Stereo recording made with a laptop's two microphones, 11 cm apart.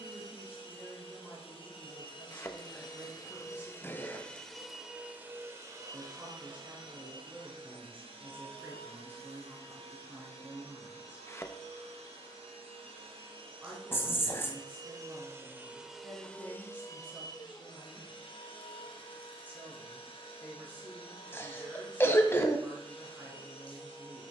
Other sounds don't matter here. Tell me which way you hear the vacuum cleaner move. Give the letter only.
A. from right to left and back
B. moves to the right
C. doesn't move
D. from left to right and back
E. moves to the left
D.